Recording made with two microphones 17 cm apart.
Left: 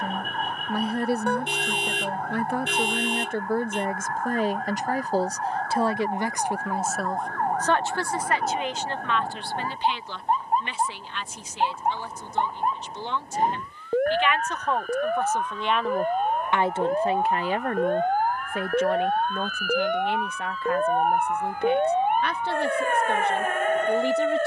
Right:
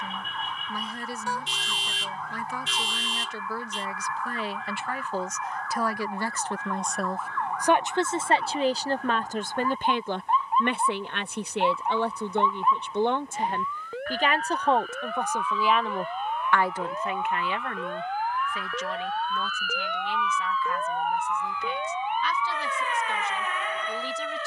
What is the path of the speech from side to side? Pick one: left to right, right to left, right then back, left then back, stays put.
right then back.